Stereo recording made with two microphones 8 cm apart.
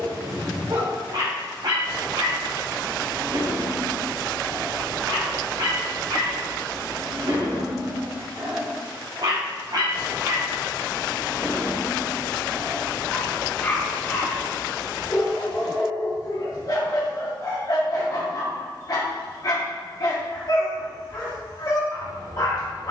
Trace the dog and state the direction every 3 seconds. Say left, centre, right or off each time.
right, right, right, right, centre, left, left, left.